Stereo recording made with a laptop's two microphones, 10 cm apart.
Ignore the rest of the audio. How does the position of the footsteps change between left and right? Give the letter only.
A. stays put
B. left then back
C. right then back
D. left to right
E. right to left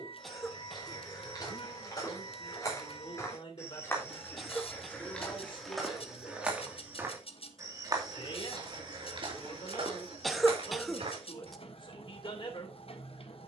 D.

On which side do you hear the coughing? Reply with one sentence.
In this clip you hear the coughing in the centre.